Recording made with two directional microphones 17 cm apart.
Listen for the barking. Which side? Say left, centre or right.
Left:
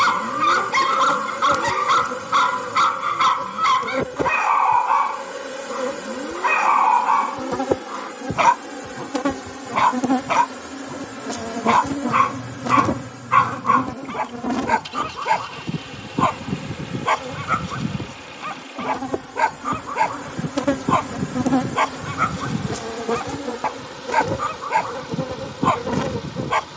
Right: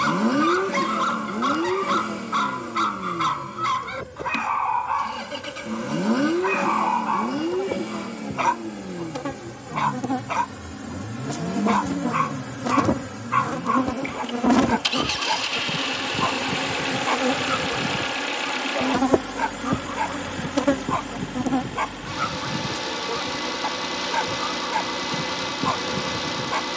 left.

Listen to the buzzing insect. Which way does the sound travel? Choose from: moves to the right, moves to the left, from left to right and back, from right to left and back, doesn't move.
from left to right and back.